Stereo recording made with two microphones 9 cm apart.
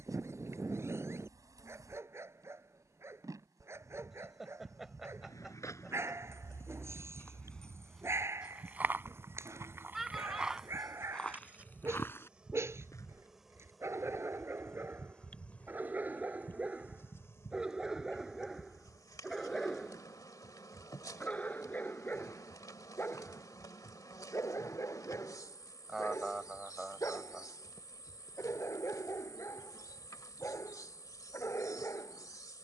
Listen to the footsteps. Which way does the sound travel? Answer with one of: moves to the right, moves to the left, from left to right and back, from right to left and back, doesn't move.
from left to right and back.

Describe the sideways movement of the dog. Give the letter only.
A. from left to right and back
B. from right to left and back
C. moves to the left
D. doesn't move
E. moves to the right
C.